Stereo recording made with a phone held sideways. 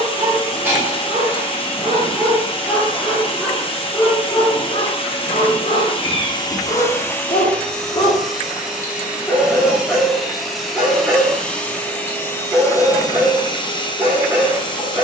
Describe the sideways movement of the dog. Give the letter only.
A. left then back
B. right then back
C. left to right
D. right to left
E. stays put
A.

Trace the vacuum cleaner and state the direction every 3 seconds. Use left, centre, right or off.
left, left, centre, centre, left.